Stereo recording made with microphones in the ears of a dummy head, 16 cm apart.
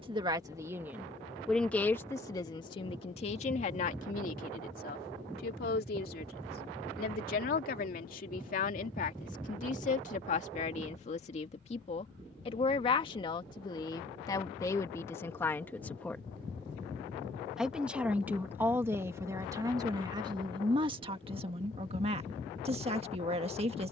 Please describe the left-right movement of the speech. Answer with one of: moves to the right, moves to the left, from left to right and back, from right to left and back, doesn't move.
from right to left and back.